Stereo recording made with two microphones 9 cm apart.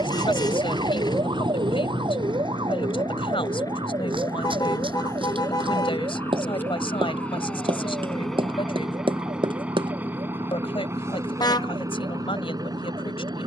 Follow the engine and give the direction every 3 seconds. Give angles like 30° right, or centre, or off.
50° left, 40° left, 10° left, 20° right, 50° right.